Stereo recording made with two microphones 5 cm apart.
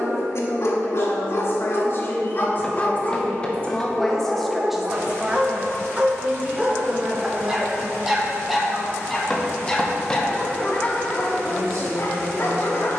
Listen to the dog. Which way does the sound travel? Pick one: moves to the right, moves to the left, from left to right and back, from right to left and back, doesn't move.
from left to right and back.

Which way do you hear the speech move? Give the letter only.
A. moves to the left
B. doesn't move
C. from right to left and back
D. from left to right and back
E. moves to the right
E.